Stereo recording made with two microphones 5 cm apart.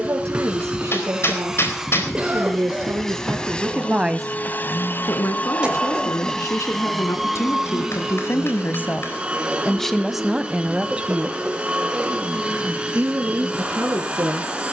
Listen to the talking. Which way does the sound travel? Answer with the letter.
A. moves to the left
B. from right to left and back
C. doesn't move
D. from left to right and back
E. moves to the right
B.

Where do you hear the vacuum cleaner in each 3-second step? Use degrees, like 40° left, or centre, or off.
10° right, 30° left, centre, 20° right, 20° right.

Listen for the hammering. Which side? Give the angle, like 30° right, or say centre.
50° left.